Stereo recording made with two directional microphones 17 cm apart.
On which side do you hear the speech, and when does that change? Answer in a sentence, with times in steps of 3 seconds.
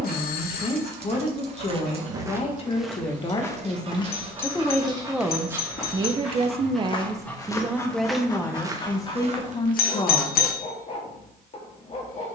You can hear the speech on the left from 0 s, in the centre from 3 s and on the left from 9 s.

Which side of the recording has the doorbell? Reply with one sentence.
In this clip you hear the doorbell on the left.